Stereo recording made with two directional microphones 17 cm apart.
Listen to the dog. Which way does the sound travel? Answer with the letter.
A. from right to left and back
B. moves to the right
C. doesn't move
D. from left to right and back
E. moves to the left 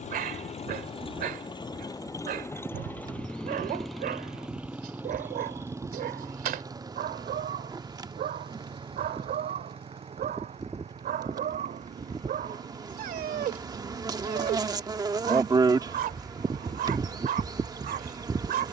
C.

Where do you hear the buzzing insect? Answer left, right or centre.
right.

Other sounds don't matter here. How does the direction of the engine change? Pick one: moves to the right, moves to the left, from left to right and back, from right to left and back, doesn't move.
moves to the right.